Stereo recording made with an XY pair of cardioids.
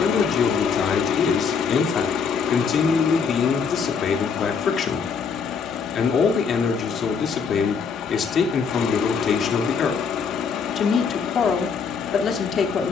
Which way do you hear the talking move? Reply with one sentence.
You can hear the talking stay in one place.